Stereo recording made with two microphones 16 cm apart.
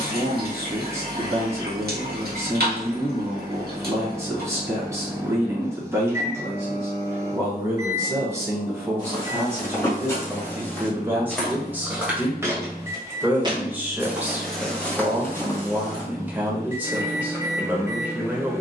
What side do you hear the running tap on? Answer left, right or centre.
right.